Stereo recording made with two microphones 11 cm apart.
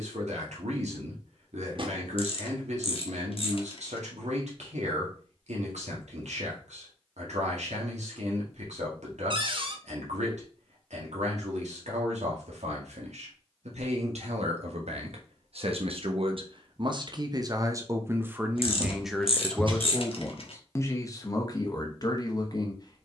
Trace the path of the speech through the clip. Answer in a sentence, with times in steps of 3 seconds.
In this clip you hear the speech on the right from 0 s, in the centre from 18 s and on the left from 21 s.